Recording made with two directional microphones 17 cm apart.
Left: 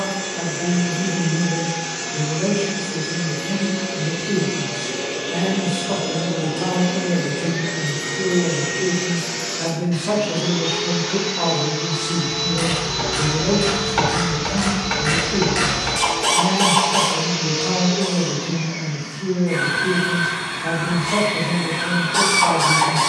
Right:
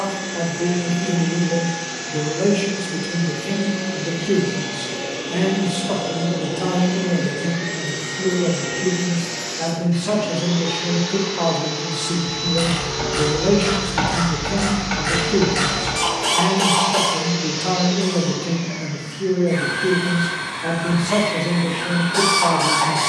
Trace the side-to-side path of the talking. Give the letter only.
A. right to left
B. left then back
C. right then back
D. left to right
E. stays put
B.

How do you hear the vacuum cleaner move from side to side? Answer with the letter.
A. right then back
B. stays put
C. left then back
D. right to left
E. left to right
B.